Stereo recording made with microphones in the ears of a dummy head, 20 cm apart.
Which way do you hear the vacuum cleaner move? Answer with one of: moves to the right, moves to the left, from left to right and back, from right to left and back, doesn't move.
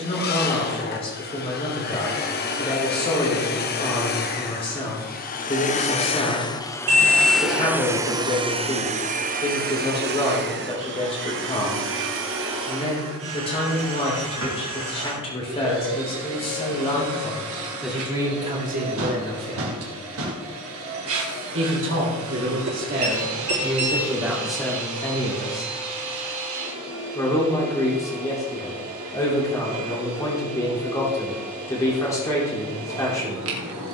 moves to the right.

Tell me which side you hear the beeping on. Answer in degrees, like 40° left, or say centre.
70° right.